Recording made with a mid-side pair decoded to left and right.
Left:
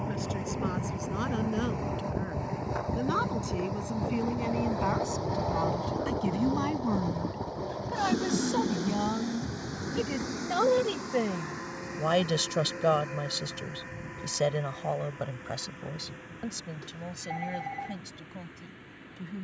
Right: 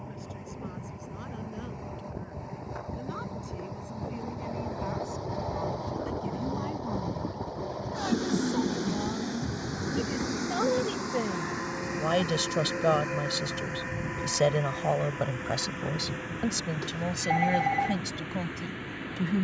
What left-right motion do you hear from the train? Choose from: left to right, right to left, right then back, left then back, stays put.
left to right.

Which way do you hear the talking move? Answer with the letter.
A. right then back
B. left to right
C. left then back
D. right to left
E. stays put
B.